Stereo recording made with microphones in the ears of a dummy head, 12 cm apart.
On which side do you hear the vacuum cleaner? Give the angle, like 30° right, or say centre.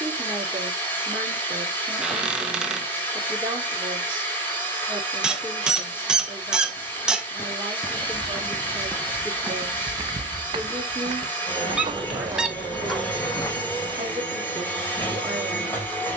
20° left.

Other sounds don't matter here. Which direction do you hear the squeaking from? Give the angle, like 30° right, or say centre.
10° right.